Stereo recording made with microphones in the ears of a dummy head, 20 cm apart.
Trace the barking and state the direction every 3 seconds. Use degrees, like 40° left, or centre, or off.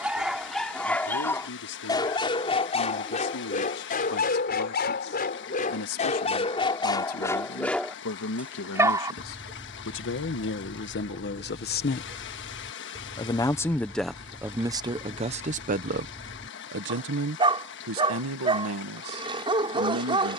10° left, 40° left, 10° left, 20° right, 20° right, 20° right, 20° right.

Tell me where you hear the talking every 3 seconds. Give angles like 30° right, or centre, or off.
80° left, 70° left, 70° left, 50° left, centre, 40° right, 70° right.